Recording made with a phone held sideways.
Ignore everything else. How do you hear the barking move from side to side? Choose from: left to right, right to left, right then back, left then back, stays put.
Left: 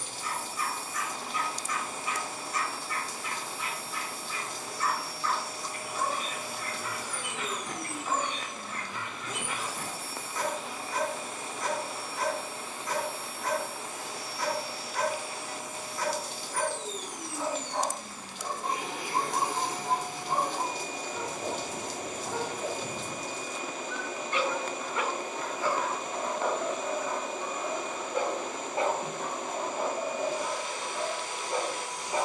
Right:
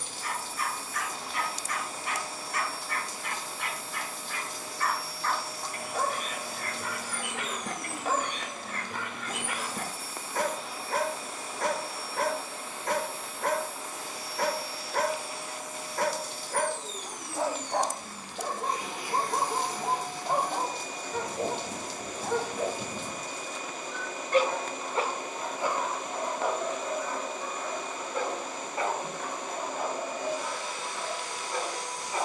right to left.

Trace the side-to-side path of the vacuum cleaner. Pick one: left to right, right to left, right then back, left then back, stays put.
stays put.